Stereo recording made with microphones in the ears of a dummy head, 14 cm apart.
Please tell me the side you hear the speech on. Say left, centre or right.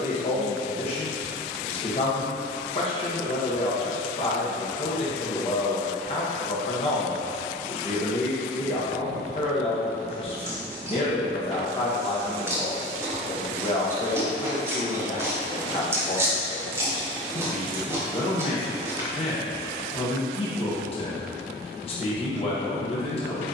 left.